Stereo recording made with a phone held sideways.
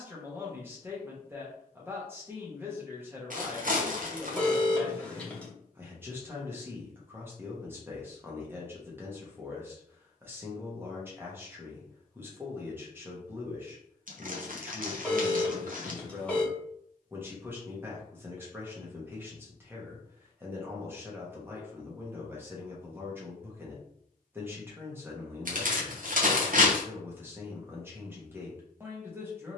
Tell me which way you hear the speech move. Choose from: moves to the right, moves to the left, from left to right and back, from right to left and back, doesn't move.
doesn't move.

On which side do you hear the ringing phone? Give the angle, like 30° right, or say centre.
10° left.